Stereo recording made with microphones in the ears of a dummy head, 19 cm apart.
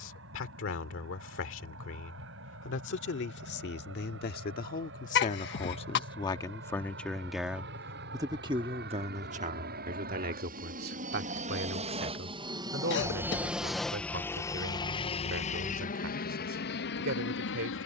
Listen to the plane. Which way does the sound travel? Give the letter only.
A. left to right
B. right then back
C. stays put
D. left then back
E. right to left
E.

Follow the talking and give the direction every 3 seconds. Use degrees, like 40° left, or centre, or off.
60° left, 40° left, centre, 40° right, 60° right, 60° right.